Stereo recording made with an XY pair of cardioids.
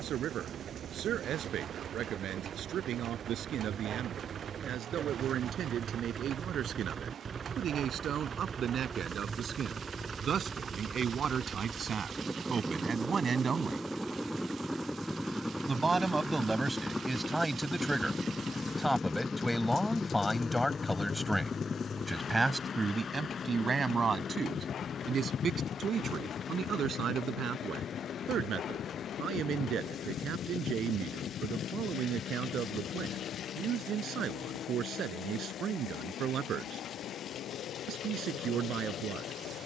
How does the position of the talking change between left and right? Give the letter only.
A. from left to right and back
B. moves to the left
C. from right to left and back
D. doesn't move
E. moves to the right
C.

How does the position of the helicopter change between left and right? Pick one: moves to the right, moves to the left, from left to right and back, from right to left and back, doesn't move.
moves to the left.